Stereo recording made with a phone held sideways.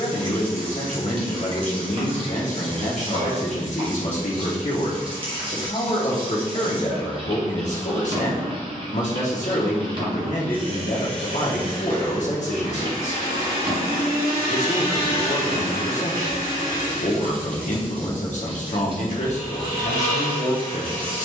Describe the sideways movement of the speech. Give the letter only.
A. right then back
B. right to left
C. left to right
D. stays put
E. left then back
D.